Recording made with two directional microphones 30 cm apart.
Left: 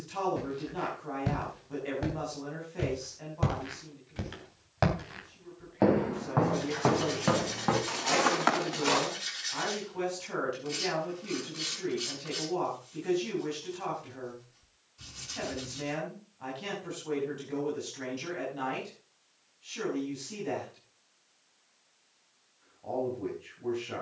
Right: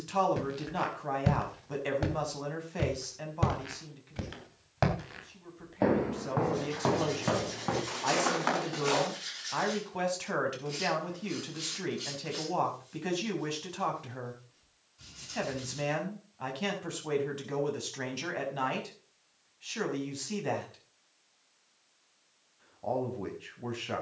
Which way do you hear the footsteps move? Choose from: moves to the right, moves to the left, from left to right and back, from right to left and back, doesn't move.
moves to the left.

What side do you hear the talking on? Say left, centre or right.
right.